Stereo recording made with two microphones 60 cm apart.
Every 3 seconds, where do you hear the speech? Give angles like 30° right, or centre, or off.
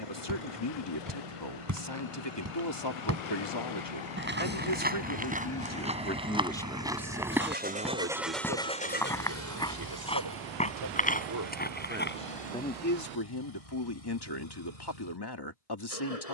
50° left, 40° left, 10° right, 40° right, 30° left, 40° left.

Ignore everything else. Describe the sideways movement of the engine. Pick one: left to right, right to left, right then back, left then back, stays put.
right to left.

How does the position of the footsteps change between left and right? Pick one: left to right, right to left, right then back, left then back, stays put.
right to left.